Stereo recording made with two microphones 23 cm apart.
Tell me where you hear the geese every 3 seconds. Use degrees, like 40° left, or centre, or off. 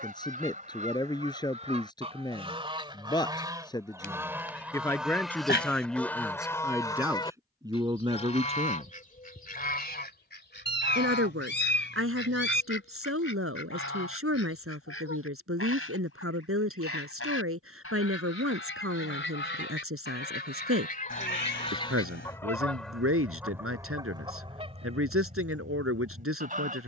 30° right, 10° right, 20° left, 40° left, 60° left, 70° left, 50° left, 10° left, 30° right.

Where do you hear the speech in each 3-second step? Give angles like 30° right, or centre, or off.
20° left, 10° left, 10° right, 60° right, 70° right, 70° right, 70° right, 70° right, 70° right.